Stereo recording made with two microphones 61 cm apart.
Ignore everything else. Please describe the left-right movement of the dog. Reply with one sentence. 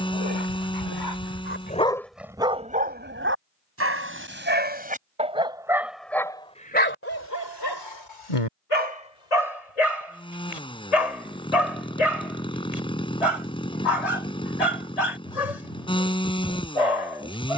You can hear the dog go right and come back.